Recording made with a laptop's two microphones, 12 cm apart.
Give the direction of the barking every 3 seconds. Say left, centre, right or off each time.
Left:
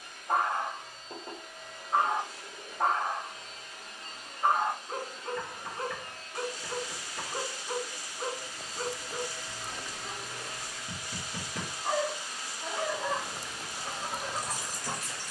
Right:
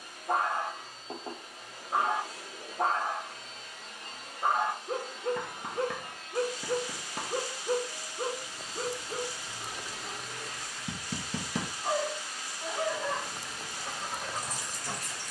right, right, right, right, centre.